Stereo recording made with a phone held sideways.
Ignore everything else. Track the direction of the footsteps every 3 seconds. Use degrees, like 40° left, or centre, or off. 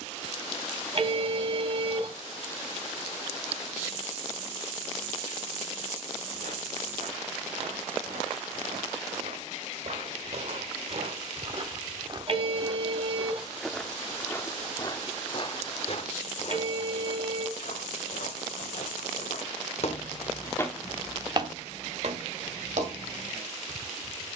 off, off, 70° right, 50° right, centre, 50° left, 50° left, 50° right.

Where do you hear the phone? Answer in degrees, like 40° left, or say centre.
50° right.